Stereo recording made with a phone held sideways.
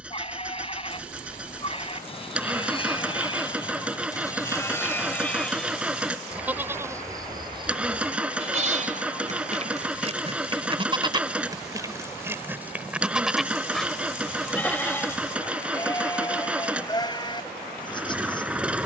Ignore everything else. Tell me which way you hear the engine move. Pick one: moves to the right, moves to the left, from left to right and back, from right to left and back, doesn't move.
doesn't move.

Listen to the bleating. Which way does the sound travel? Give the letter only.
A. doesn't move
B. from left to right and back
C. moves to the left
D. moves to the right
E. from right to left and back
B.